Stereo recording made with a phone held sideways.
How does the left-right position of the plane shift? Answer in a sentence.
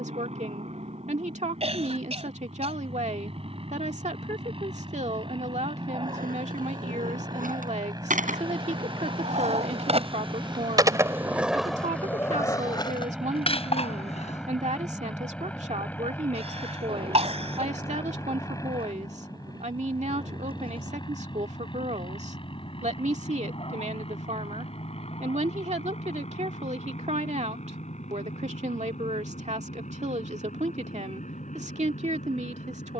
You can hear the plane move from right to left.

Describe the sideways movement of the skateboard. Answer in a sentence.
You can hear the skateboard move to the left.